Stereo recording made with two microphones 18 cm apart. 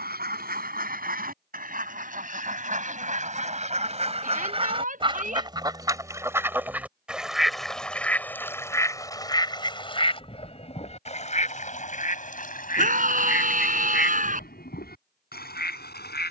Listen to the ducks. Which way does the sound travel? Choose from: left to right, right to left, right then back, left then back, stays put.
right to left.